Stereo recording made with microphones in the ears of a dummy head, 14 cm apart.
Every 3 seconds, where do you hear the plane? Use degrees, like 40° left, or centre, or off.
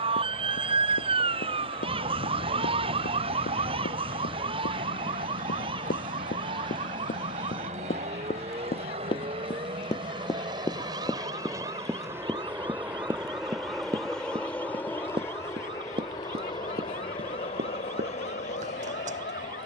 60° right, 50° right, 50° right, 30° right, centre, 30° left, 40° left.